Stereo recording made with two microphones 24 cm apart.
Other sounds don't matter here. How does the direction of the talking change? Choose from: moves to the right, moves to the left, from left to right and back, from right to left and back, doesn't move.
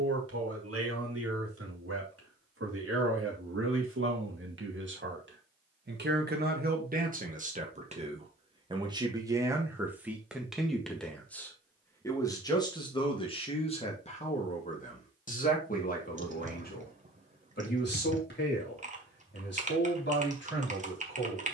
moves to the left.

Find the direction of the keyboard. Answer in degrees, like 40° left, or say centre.
30° right.